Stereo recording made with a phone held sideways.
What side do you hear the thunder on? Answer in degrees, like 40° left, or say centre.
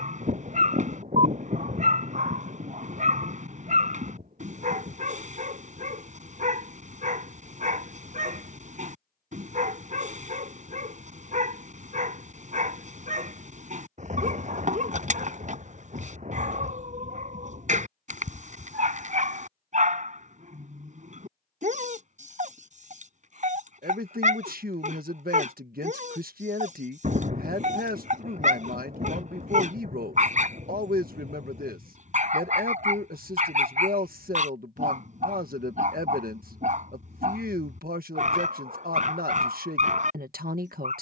50° right.